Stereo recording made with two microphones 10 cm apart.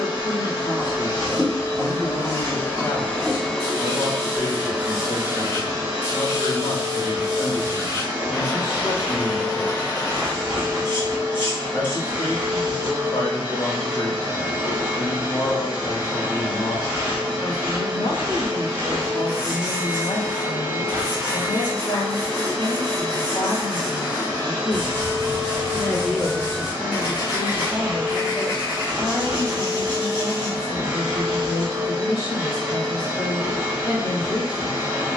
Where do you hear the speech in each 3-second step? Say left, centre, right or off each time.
left, left, left, left, left, left, left, left, centre, centre, left, left.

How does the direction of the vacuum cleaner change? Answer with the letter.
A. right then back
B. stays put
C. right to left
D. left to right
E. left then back
D.